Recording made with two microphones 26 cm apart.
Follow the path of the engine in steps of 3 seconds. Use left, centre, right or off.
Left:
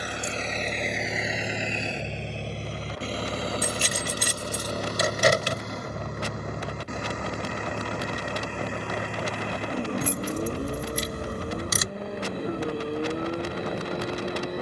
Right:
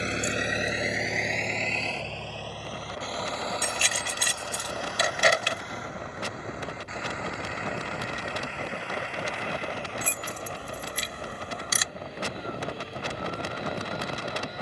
centre, left, left, left, left.